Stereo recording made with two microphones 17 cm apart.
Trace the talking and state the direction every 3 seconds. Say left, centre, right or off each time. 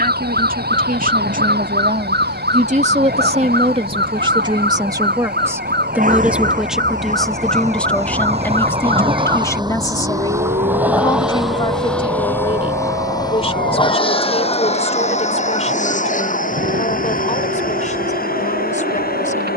right, right, centre, left, left, left, left.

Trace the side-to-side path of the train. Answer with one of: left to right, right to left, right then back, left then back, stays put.
right to left.